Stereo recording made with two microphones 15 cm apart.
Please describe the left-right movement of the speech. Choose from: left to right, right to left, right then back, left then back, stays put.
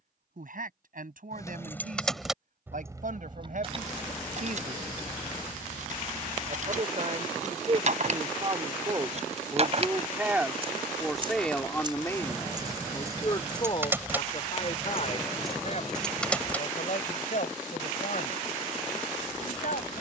right to left.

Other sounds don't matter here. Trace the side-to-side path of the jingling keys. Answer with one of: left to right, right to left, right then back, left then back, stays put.
right then back.